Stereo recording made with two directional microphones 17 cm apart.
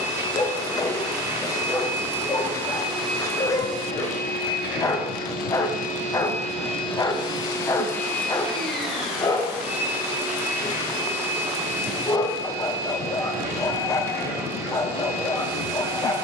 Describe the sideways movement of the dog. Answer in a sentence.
In this clip you hear the dog stay in one place.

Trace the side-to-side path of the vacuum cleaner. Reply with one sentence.
You can hear the vacuum cleaner move from right to left and back again.